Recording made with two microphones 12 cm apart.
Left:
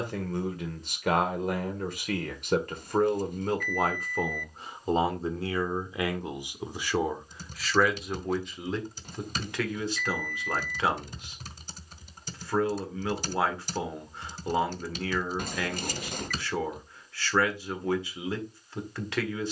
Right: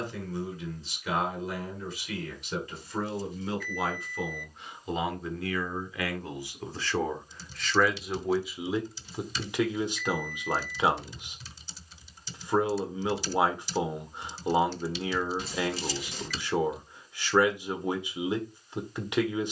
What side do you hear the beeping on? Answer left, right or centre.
left.